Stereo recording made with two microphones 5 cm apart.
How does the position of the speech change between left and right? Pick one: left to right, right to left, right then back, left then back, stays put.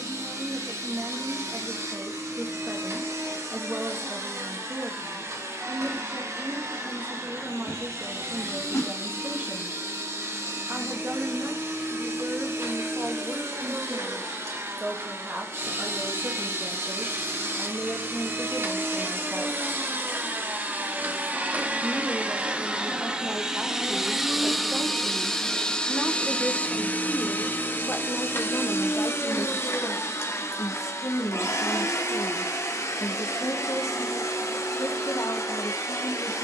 right to left.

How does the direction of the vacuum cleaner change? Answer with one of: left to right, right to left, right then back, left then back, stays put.
right to left.